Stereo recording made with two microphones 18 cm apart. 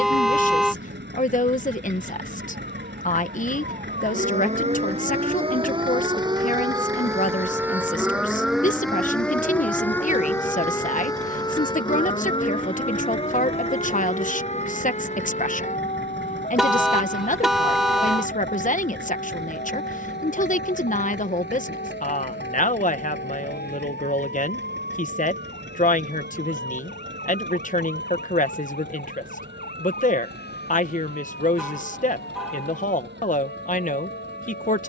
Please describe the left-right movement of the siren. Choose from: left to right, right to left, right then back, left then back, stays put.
right to left.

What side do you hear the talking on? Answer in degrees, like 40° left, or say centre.
50° left.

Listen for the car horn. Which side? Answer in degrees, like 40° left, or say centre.
centre.